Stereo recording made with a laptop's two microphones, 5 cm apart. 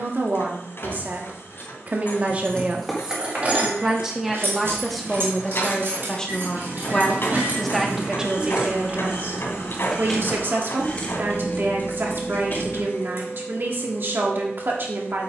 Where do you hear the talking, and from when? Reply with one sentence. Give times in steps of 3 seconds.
You can hear the talking on the right from 0 s, in the centre from 3 s and on the right from 9 s.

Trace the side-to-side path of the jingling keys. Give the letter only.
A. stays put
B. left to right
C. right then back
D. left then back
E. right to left
C.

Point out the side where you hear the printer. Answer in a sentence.
You can hear the printer on the left.